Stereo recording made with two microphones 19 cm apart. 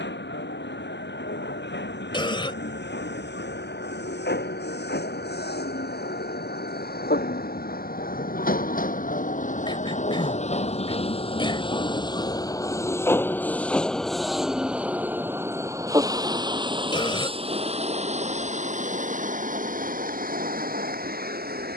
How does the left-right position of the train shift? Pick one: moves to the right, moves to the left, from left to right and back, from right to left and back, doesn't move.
moves to the right.